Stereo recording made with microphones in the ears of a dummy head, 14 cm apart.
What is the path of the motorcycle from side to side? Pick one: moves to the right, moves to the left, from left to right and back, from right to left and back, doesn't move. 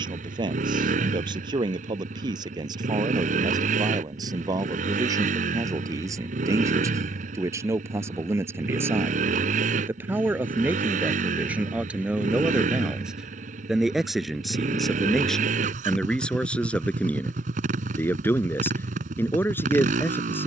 doesn't move.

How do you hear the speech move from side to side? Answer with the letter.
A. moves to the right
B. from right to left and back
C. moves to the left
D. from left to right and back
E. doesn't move
C.